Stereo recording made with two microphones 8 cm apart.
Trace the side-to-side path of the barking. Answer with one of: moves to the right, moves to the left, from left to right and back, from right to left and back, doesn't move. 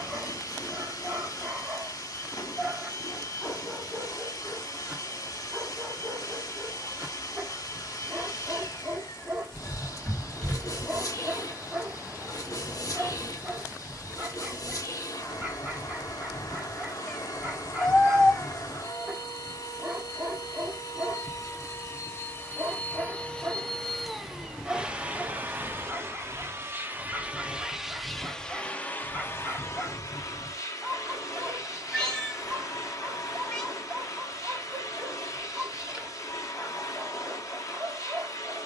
doesn't move.